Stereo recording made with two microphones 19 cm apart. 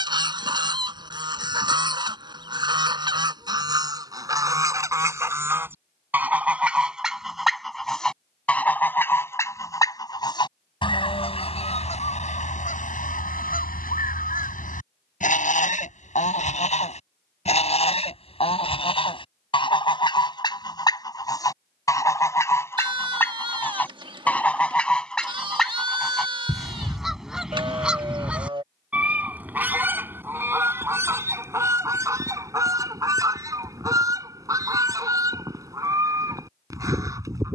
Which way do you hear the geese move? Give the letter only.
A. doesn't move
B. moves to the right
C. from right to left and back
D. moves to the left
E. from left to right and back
C.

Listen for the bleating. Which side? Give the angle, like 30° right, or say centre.
30° right.